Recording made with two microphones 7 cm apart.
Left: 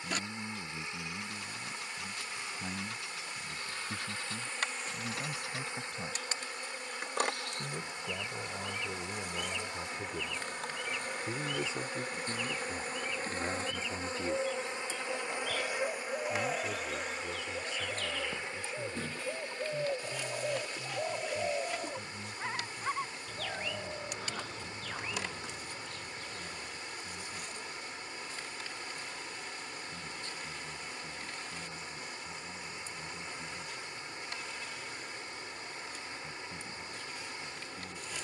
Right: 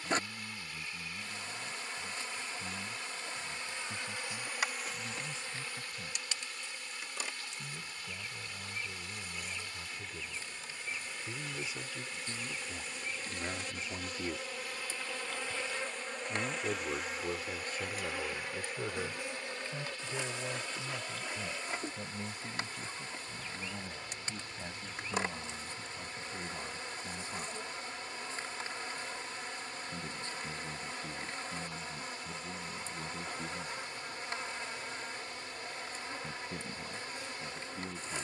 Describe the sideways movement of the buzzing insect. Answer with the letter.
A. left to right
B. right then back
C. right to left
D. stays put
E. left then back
E.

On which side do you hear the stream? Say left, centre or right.
left.